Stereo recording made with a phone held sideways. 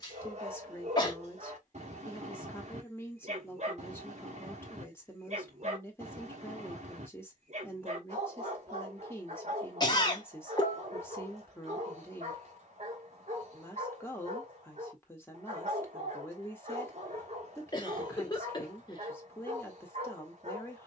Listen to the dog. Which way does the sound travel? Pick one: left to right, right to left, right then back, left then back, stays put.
stays put.